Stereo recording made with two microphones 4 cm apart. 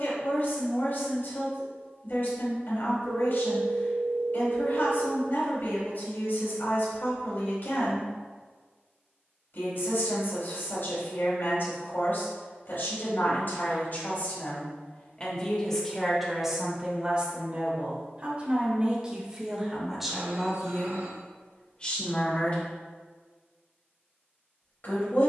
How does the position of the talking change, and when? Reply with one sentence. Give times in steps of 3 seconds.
In this clip you hear the talking on the left from 0 s, in the centre from 15 s and on the left from 21 s.